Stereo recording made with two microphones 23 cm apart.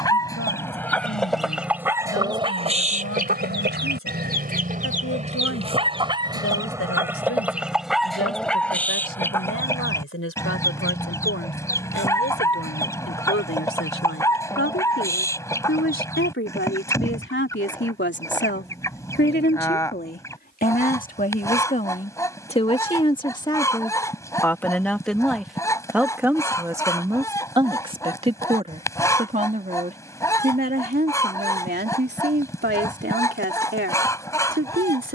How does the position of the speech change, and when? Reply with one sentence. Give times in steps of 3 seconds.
In this clip you hear the speech on the left from 0 s, in the centre from 24 s and on the right from 27 s.